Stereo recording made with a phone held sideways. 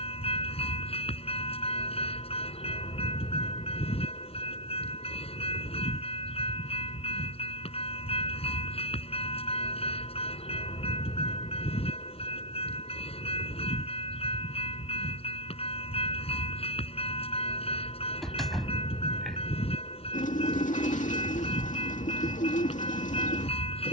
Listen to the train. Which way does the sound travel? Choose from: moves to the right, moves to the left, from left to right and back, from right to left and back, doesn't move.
doesn't move.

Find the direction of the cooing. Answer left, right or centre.
left.